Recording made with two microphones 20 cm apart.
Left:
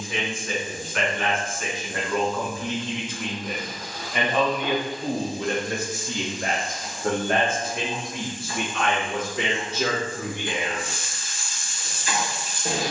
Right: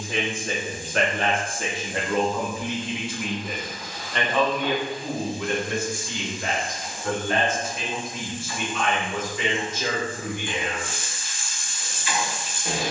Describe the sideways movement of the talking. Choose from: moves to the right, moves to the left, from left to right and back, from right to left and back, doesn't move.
moves to the left.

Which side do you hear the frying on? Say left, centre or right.
left.